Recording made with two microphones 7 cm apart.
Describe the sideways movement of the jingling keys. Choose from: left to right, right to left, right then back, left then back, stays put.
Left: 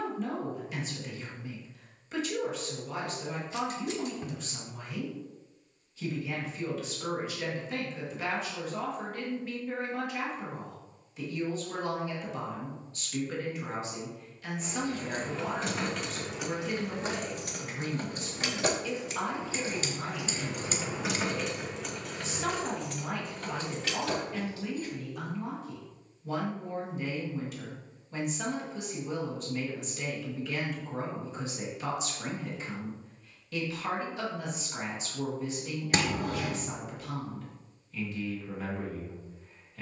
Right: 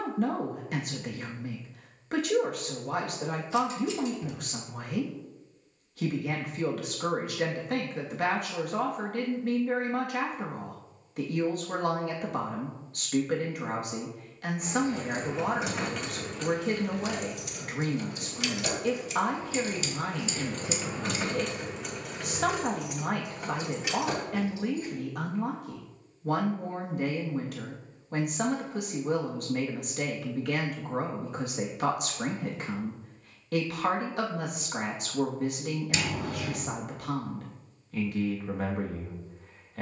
left then back.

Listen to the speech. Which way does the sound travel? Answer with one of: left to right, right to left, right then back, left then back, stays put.
stays put.